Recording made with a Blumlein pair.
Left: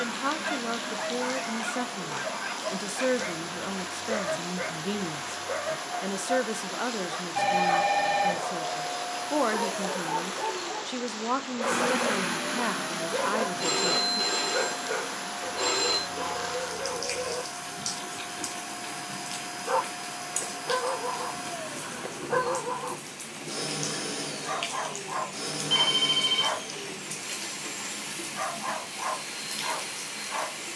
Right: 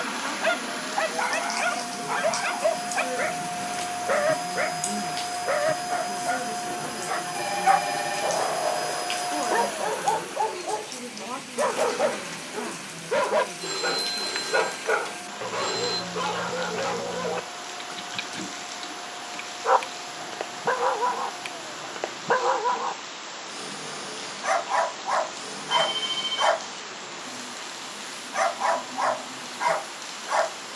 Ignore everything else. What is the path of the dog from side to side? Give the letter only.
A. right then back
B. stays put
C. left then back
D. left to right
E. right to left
B.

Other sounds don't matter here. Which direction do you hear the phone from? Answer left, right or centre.
left.